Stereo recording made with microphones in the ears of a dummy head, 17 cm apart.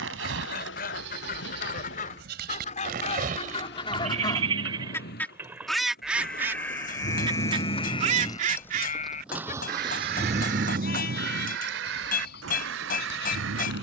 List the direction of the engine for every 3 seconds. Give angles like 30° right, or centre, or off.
70° left, 60° left, 30° left, 40° right, 70° right.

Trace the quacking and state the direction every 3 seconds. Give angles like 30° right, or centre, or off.
50° left, 20° left, 30° right, 60° right, 70° right.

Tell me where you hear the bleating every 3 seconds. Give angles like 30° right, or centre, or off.
60° right, 30° right, 20° left, 50° left, 60° left.